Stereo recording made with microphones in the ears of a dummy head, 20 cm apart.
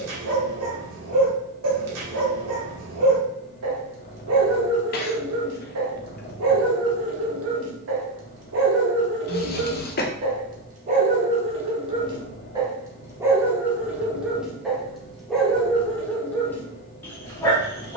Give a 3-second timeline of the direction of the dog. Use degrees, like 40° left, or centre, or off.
80° right, 80° right, 70° right, 40° right, 10° right, 10° left.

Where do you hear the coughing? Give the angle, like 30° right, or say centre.
40° left.